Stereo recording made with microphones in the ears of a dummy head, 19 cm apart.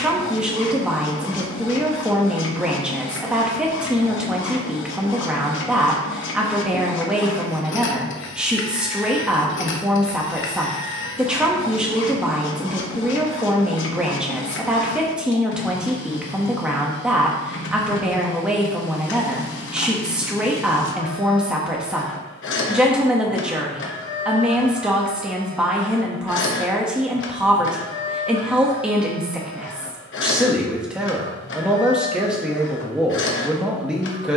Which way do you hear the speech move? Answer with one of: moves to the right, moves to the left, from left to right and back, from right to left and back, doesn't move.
doesn't move.